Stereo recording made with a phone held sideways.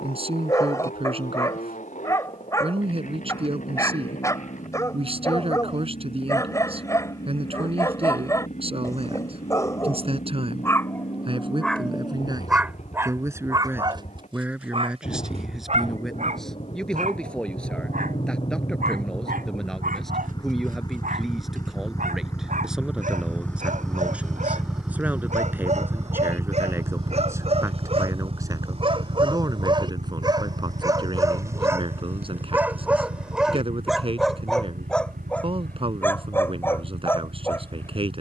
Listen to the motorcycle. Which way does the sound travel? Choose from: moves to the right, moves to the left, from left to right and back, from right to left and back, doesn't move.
moves to the right.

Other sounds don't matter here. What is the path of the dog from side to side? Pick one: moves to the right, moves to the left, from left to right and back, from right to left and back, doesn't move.
from left to right and back.